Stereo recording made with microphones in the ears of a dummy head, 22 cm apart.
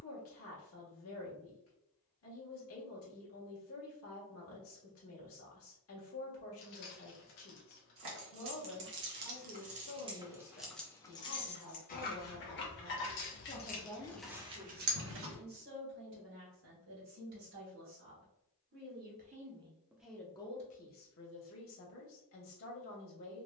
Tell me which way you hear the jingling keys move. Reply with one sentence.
You can hear the jingling keys go left and come back.